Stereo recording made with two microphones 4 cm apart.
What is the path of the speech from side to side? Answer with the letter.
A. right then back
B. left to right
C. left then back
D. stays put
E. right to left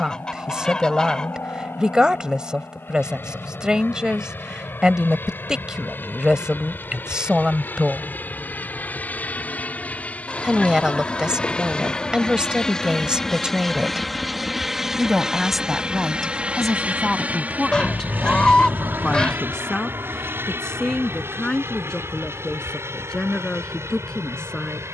E.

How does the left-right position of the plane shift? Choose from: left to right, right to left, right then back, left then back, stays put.
left to right.